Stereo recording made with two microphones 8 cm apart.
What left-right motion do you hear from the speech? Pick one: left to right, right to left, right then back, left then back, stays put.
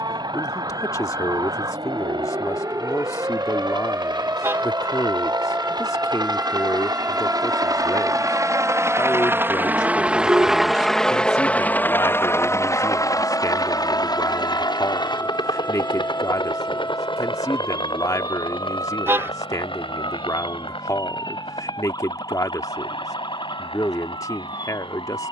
stays put.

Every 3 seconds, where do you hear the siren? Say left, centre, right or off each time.
right, right, centre, centre, left, left, left, left, left.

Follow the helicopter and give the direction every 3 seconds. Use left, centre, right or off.
right, right, right, centre, left, left, left, left, left.